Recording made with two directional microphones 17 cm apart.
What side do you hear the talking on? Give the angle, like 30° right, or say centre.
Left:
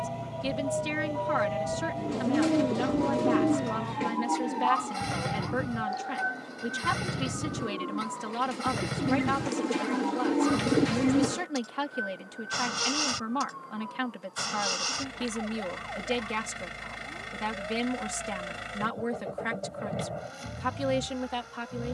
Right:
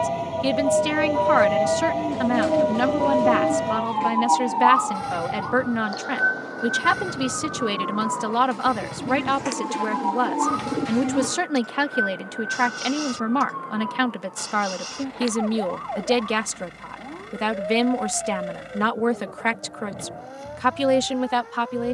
60° right.